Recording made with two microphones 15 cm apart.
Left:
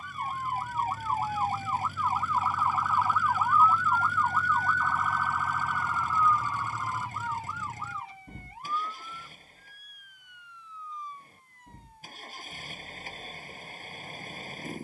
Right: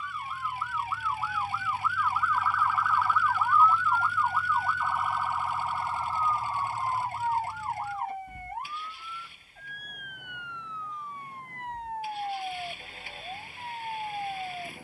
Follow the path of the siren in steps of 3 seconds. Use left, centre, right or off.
left, centre, right, right, right.